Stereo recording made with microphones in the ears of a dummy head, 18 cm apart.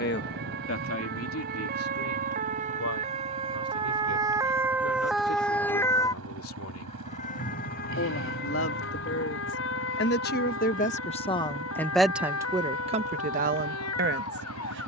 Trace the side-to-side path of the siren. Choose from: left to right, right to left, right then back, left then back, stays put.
right to left.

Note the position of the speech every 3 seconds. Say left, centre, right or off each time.
left, left, left, left, right.